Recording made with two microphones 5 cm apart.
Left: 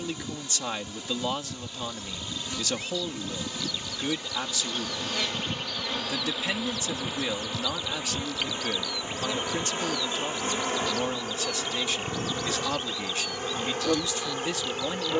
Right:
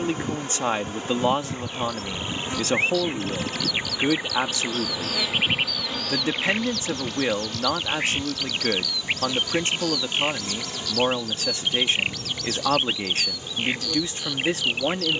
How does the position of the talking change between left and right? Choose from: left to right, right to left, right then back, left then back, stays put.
stays put.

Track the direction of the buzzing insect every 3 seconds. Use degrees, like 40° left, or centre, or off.
40° right, 20° right, 10° left, 40° left, 50° left.